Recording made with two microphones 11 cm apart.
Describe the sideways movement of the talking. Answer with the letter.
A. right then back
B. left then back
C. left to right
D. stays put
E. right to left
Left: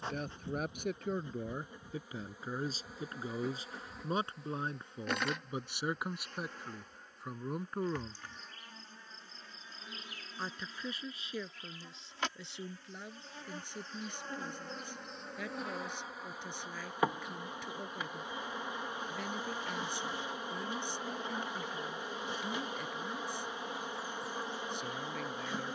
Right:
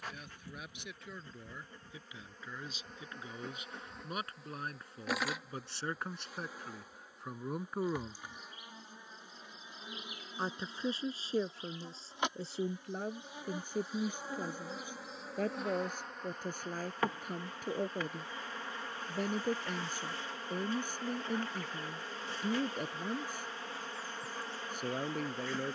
C.